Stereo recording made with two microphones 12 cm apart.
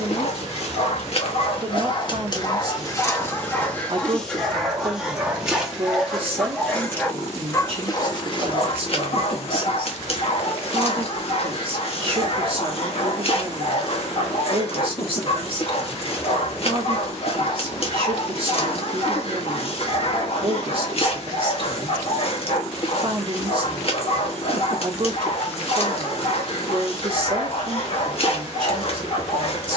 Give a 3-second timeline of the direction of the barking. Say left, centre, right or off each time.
left, centre, left, left, left, left, left, left, left, left.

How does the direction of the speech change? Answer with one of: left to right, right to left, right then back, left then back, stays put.
stays put.